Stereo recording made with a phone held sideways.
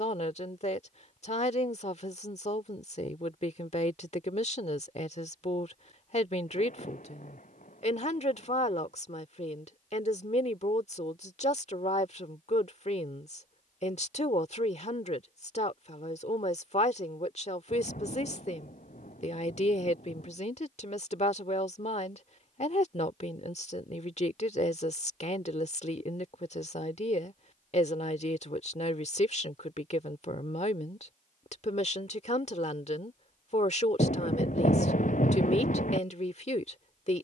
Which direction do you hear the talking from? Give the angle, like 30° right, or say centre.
50° left.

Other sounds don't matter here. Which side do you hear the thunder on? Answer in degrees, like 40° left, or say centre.
60° left.